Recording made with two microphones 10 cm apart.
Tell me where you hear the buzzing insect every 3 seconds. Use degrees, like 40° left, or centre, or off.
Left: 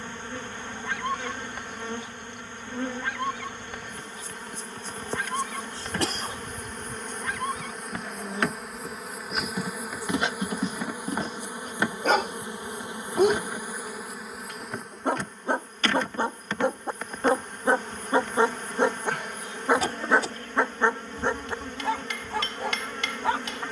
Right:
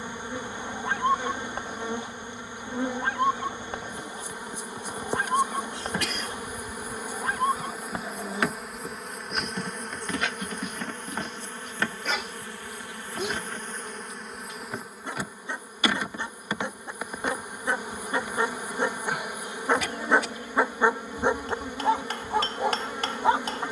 10° right, 10° right, 10° right, 10° left, 10° left, 10° right, 10° right, 10° right.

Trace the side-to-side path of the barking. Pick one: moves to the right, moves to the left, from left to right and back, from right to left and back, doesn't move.
from right to left and back.